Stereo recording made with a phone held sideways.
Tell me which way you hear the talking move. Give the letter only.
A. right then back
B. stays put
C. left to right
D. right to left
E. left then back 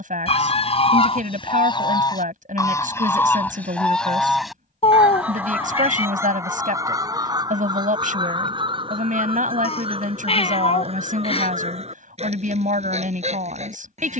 B.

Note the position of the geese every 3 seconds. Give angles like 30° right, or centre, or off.
40° left, centre, 30° right, 40° right, 50° right.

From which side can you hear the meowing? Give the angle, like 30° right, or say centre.
40° left.